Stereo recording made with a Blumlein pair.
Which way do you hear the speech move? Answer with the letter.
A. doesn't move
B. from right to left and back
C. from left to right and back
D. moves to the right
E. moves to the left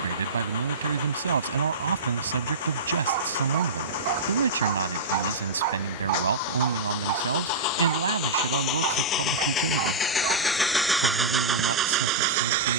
A.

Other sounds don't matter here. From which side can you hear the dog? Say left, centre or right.
right.